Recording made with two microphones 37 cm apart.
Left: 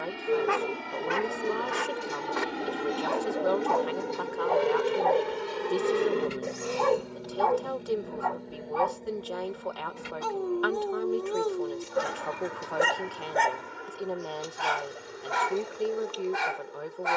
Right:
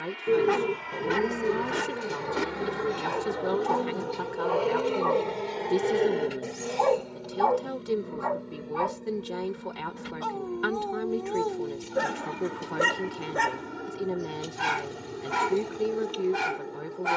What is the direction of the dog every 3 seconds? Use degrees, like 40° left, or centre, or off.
50° right, 30° right, 30° left, 30° left, 10° right, 40° right.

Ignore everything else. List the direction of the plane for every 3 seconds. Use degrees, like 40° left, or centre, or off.
50° left, 30° left, centre, 30° right, 50° right, 50° right.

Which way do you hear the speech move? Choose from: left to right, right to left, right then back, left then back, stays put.
stays put.